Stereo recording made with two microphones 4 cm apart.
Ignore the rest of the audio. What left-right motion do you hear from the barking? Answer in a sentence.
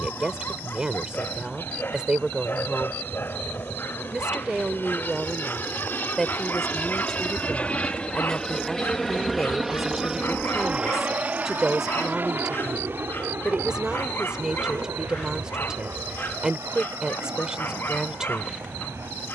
You can hear the barking stay put.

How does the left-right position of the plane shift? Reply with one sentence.
In this clip you hear the plane go from the left side to the right.